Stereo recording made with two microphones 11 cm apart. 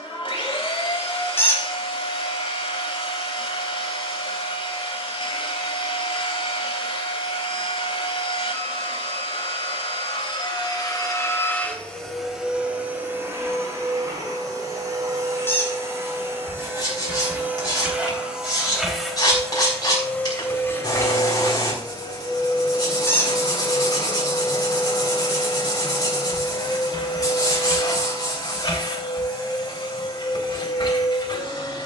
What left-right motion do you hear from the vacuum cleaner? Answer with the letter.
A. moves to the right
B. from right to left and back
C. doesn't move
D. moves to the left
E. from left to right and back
E.